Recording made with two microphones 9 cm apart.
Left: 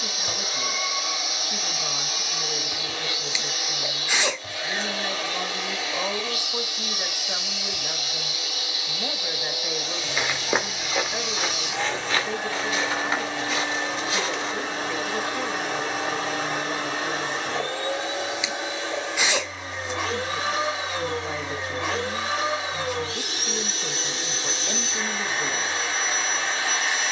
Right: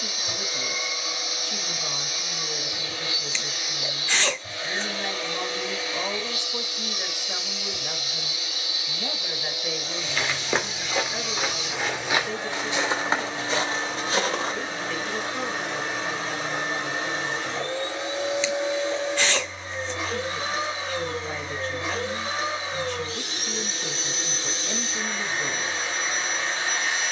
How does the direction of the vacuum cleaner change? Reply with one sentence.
In this clip you hear the vacuum cleaner stay put.